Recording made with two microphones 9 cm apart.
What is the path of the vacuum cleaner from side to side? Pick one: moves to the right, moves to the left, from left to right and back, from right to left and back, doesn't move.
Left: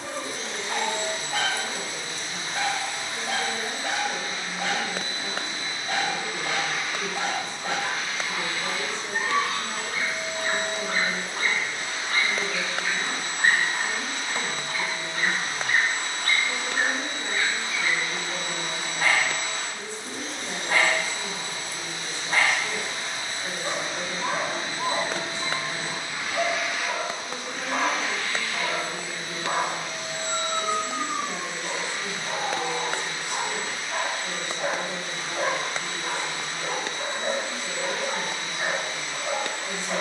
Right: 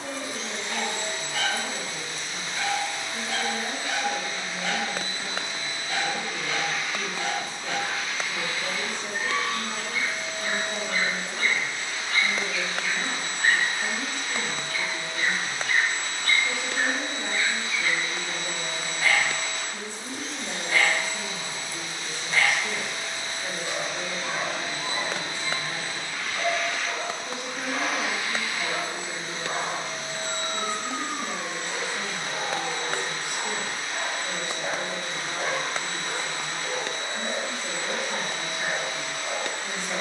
moves to the right.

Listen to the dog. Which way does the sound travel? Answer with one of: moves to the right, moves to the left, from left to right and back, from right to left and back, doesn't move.
doesn't move.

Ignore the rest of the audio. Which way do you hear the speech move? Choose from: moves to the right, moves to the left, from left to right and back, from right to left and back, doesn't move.
doesn't move.